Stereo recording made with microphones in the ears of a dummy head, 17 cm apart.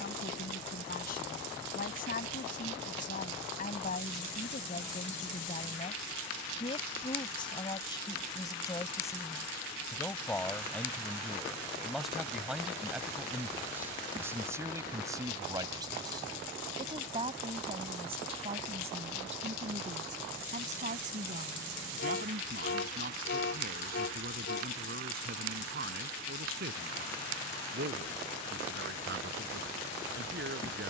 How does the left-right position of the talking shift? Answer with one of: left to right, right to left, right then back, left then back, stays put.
left to right.